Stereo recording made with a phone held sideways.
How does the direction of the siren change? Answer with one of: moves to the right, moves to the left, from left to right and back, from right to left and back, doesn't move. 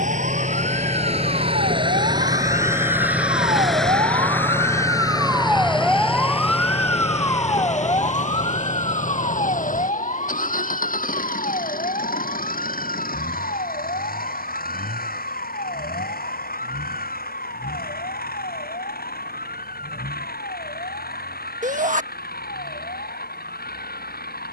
moves to the left.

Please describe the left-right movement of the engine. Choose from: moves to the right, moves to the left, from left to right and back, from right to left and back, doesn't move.
moves to the left.